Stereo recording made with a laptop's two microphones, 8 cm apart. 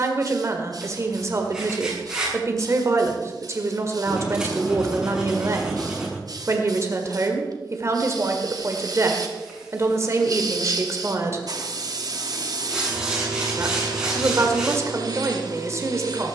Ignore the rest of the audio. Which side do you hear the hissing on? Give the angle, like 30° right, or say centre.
60° right.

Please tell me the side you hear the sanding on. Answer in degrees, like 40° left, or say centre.
10° right.